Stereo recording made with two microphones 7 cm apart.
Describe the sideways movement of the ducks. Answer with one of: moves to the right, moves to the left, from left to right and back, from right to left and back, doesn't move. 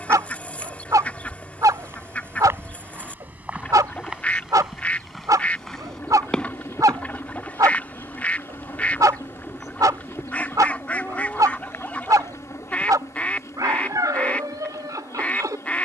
doesn't move.